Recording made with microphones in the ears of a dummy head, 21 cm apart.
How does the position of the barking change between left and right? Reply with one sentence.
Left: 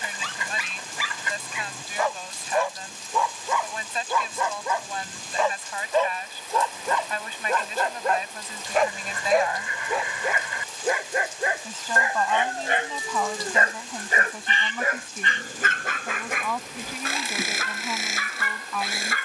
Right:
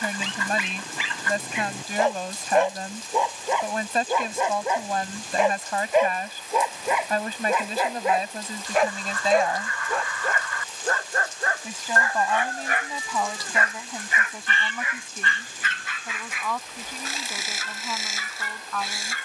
You can hear the barking move to the left.